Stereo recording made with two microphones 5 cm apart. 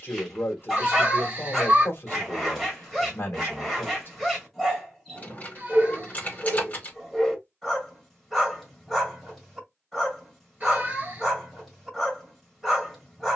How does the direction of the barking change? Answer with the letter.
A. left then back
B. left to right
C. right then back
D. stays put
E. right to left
D.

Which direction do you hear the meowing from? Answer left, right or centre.
right.